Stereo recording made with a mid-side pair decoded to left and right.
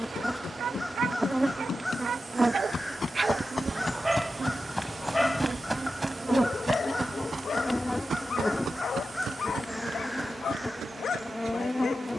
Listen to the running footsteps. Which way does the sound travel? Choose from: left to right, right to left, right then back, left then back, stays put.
left to right.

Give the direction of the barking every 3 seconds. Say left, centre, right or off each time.
right, centre, left, left.